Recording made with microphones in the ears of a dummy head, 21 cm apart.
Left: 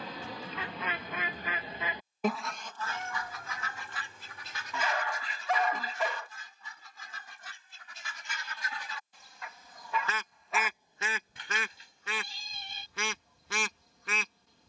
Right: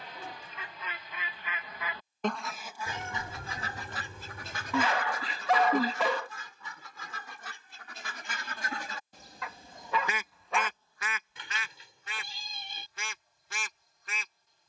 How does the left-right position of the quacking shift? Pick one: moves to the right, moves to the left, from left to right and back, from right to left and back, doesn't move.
from left to right and back.